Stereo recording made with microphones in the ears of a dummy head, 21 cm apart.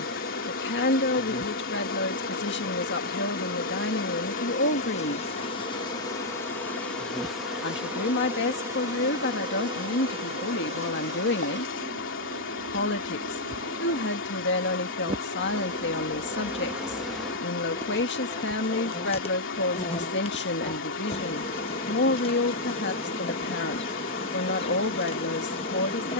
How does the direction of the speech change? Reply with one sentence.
You can hear the speech stay in one place.